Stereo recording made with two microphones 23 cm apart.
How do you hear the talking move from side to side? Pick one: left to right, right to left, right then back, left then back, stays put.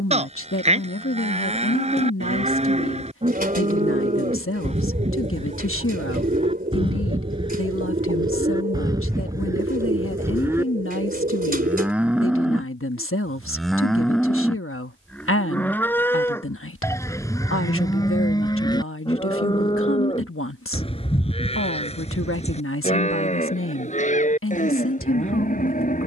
stays put.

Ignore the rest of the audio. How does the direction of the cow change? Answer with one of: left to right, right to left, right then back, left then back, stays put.
right to left.